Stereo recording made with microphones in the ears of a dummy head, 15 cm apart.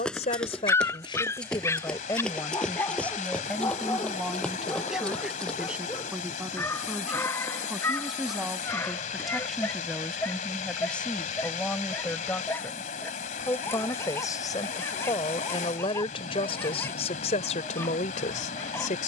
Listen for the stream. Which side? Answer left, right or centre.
left.